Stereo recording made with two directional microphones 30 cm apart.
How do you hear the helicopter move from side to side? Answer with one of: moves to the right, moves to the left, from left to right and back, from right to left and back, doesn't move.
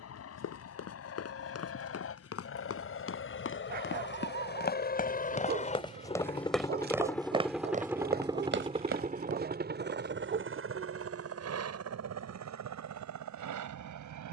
moves to the right.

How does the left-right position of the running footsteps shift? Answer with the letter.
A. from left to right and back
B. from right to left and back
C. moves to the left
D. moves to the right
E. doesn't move
D.